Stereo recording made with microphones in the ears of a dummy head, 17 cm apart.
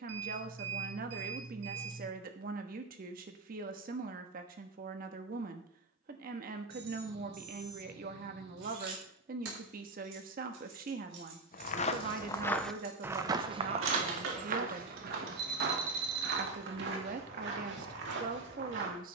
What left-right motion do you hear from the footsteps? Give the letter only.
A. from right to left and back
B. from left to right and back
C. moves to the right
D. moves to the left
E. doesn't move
C.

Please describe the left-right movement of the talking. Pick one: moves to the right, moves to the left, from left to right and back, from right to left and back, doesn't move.
doesn't move.